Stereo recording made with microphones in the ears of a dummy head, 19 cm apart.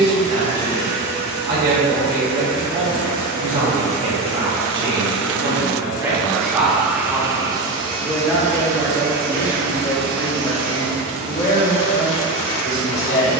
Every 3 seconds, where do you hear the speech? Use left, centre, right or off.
right, right, centre, left, left.